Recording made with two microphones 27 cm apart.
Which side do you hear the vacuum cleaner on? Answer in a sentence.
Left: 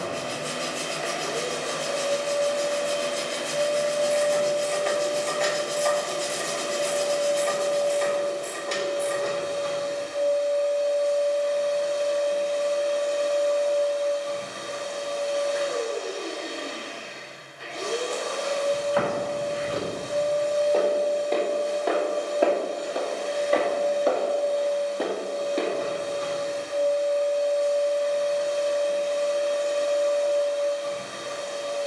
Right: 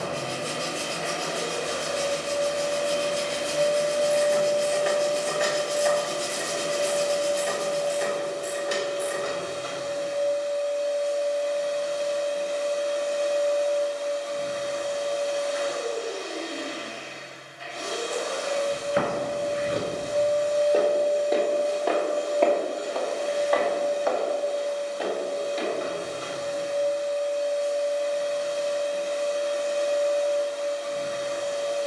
In this clip you hear the vacuum cleaner on the left.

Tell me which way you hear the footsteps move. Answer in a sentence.
You can hear the footsteps go from the right side to the left.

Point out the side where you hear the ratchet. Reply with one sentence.
You can hear the ratchet in the centre.